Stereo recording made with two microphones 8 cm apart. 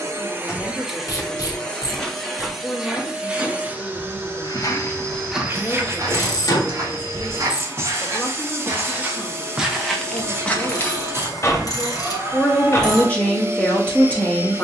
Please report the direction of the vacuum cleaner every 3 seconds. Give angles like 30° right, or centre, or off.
centre, 20° right, 30° right, 30° right, 30° right.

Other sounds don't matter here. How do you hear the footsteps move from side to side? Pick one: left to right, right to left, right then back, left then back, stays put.
right then back.